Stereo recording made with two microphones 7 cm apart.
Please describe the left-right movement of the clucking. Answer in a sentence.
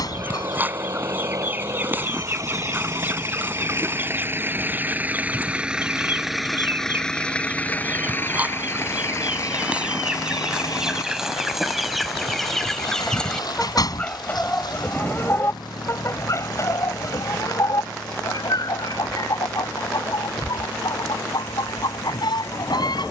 You can hear the clucking travel towards the left.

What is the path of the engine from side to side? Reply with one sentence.
You can hear the engine move from right to left.